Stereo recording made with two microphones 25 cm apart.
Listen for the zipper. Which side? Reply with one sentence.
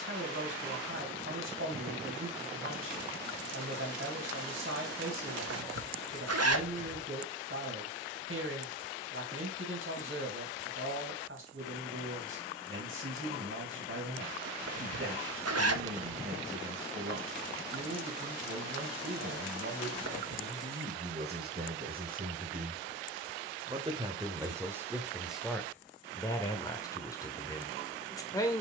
You can hear the zipper on the right.